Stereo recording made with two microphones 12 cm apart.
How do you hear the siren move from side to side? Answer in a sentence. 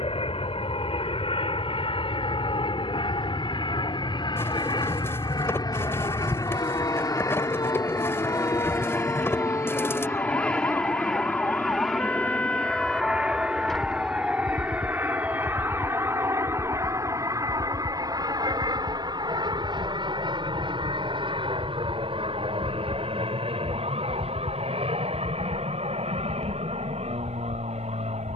You can hear the siren move from left to right.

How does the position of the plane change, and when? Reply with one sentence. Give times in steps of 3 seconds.
You can hear the plane on the left from 0 s, in the centre from 9 s and on the right from 15 s.